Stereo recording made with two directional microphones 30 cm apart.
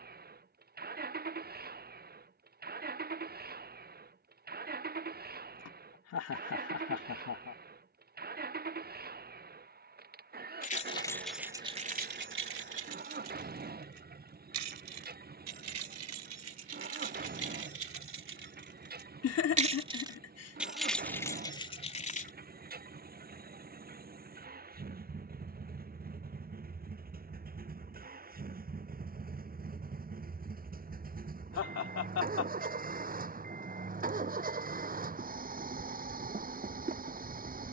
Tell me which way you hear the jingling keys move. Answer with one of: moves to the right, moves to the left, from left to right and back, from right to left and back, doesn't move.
from left to right and back.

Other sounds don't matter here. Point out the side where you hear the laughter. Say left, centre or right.
left.